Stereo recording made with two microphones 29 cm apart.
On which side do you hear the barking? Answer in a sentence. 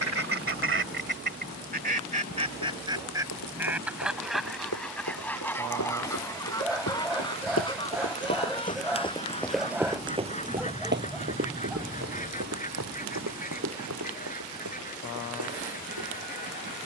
In this clip you hear the barking in the centre.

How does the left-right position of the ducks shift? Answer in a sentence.
You can hear the ducks move to the left.